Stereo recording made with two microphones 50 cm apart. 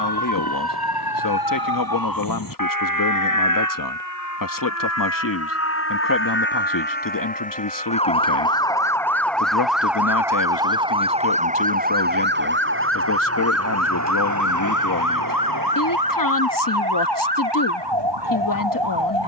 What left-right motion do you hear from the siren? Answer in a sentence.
In this clip you hear the siren move from left to right.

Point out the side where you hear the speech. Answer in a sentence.
You can hear the speech on the left.